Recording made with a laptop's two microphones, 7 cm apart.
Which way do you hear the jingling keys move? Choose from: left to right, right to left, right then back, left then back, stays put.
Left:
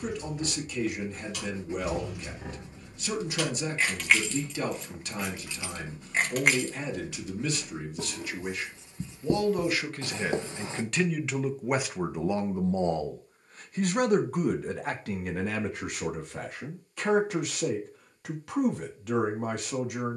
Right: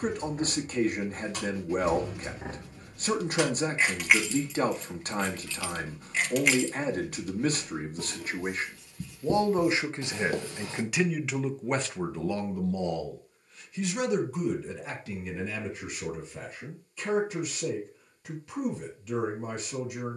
right to left.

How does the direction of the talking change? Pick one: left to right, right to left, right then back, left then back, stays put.
right to left.